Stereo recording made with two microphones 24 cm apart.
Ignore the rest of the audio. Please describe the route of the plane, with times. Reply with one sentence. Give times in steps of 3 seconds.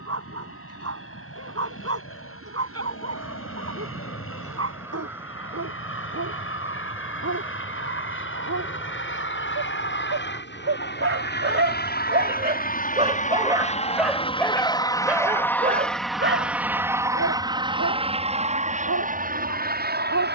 You can hear the plane on the left from 0 s, in the centre from 15 s and on the right from 18 s.